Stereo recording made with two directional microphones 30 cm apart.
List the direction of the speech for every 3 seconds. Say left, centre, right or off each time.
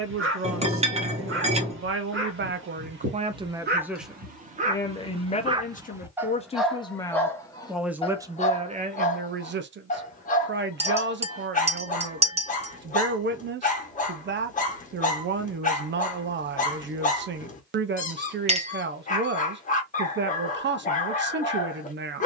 right, centre, centre, right, right, right, right, right.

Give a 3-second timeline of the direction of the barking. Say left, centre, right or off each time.
right, right, centre, left, left, left, left, left.